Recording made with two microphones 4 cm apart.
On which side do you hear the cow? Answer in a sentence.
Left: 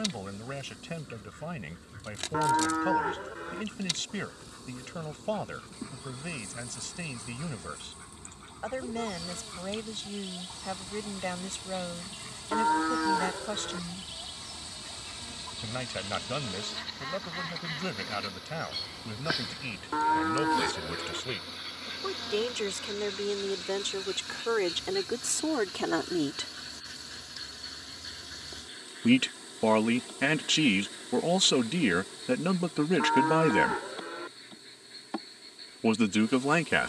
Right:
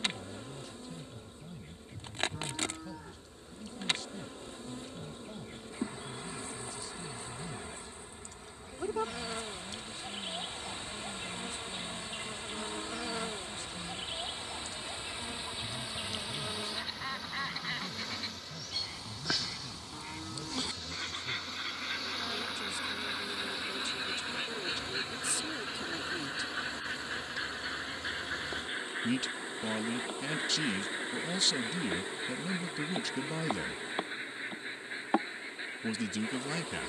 In this clip you hear the cow on the left.